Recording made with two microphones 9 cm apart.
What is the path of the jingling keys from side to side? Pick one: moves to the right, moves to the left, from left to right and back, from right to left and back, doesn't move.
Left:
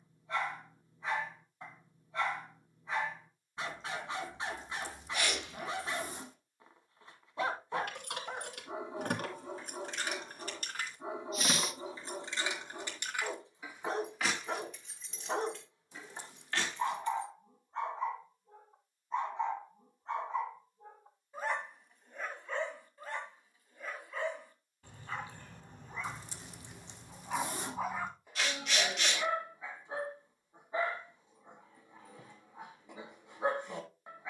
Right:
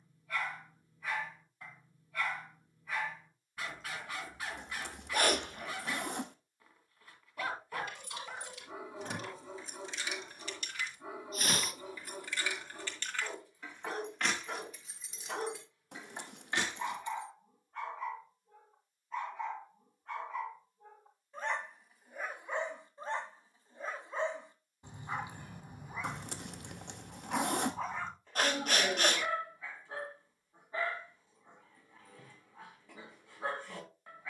moves to the right.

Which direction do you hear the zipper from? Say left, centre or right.
right.